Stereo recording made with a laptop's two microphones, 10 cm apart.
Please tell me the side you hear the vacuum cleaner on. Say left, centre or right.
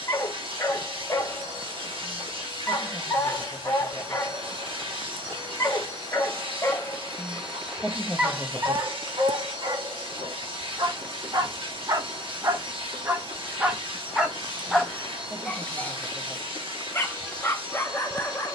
right.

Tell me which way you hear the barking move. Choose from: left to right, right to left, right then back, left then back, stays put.
right then back.